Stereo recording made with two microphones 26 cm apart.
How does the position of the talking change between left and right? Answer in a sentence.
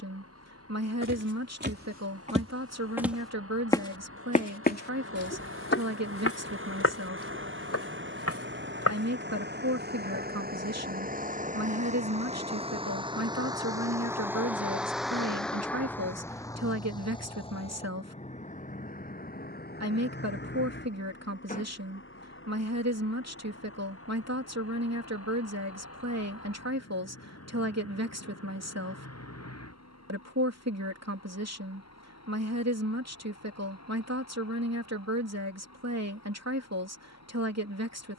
You can hear the talking stay put.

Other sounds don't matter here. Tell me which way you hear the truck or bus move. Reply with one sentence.
In this clip you hear the truck or bus travel towards the left.